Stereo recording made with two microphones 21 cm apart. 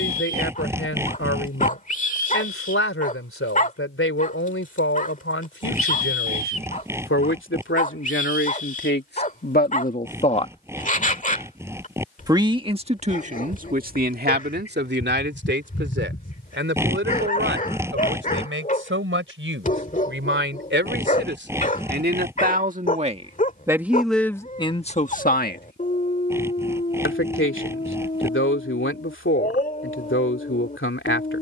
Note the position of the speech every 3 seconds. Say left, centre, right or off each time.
left, left, left, left, right, right, right, right, left, left, left.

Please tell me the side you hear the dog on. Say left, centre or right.
left.